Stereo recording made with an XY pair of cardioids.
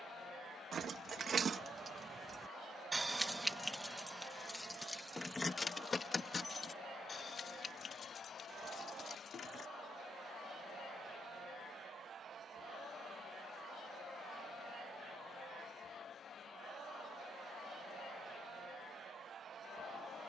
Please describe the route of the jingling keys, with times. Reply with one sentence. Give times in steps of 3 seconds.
In this clip you hear the jingling keys on the right from 0 s, in the centre from 3 s, on the left from 6 s and not at all from 12 s.